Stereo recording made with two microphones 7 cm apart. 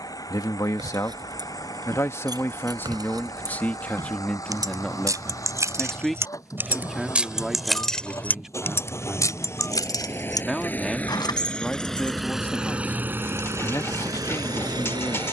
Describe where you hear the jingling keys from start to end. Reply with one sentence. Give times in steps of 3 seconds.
In this clip you hear the jingling keys on the right from 0 s, in the centre from 6 s, on the left from 9 s and not at all from 12 s.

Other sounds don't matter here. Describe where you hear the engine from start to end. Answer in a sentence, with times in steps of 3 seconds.
You can hear the engine on the left from 0 s and on the right from 12 s.